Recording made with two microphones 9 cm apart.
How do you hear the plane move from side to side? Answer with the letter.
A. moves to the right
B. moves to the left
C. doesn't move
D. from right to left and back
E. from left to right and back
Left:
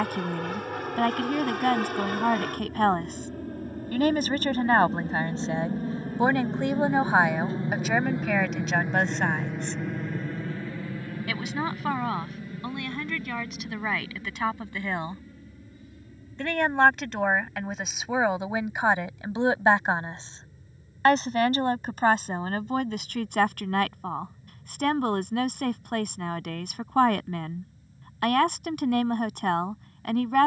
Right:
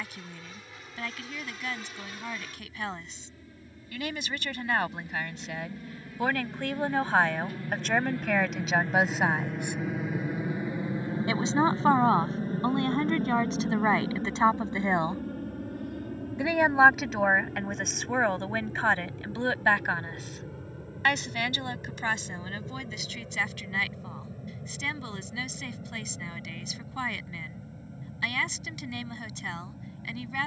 A.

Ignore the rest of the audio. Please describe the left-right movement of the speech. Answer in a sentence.
In this clip you hear the speech move from left to right and back again.